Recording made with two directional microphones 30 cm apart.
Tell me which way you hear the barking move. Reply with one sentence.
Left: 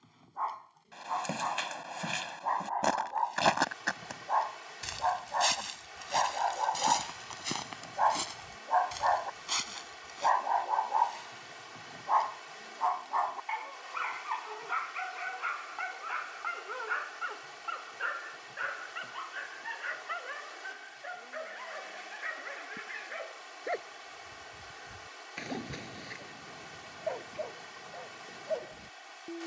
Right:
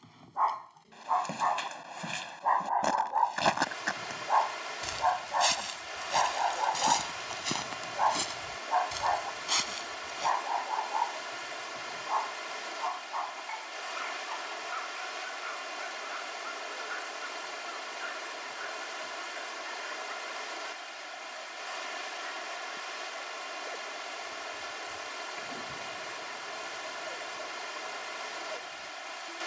In this clip you hear the barking move from right to left.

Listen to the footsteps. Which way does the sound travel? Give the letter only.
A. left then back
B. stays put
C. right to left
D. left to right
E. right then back
D.